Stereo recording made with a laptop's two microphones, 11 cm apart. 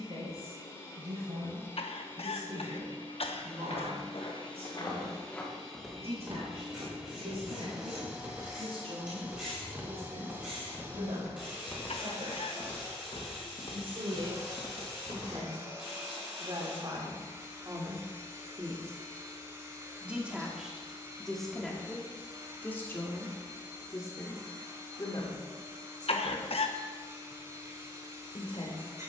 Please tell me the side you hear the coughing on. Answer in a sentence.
In this clip you hear the coughing on the left.